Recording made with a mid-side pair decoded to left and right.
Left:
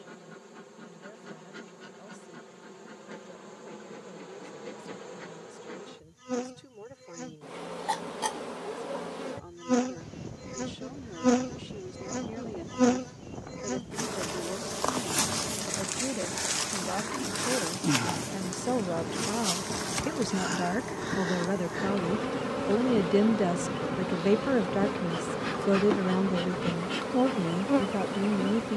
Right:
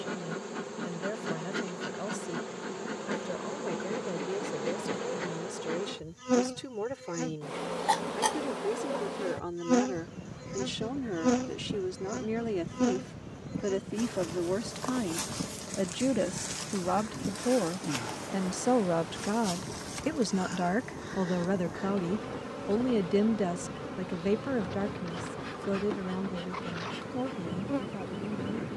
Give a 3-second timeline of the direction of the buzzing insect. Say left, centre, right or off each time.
right, right, right, centre, left, left, left, left, left, left.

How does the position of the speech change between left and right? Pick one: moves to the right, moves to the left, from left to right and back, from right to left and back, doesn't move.
moves to the left.